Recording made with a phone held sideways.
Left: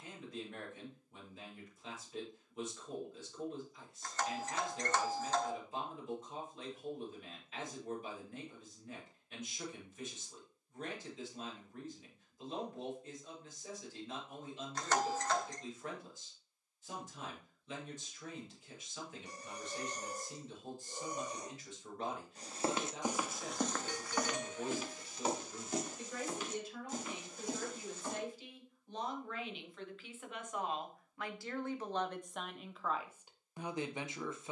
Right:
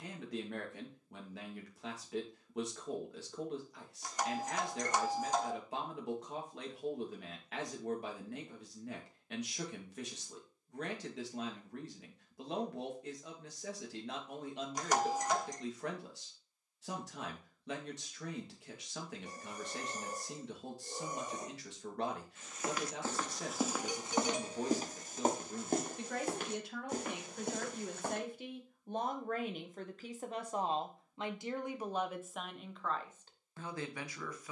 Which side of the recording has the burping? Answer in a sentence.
You can hear the burping on the right.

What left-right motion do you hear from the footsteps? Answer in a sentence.
In this clip you hear the footsteps move to the right.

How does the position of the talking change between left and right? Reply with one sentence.
In this clip you hear the talking go from the right side to the left.